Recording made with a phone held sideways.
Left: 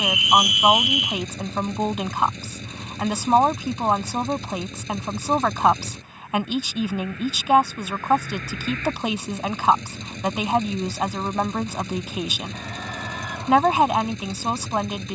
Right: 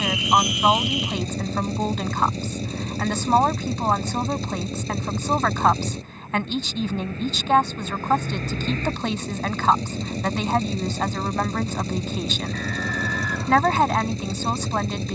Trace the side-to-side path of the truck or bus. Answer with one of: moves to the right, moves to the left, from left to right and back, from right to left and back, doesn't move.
doesn't move.